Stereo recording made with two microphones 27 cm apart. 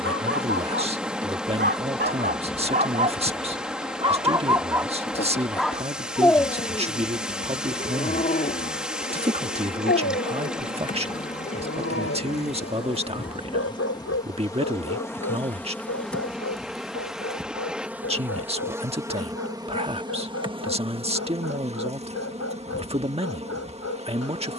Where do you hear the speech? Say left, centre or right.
right.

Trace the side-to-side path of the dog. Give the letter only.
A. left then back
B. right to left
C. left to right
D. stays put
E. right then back
B.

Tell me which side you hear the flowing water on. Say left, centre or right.
centre.